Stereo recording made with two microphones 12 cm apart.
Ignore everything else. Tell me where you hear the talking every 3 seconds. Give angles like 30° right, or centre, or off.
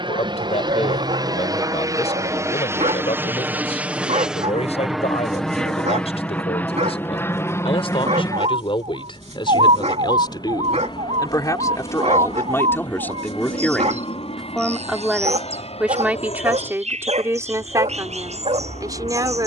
60° left, 60° left, 50° left, 40° left, 10° left, 20° right, 30° right.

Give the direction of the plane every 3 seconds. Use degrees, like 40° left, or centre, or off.
30° right, centre, 20° left, 30° left, 40° left, 50° left, 50° left.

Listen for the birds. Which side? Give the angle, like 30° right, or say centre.
60° right.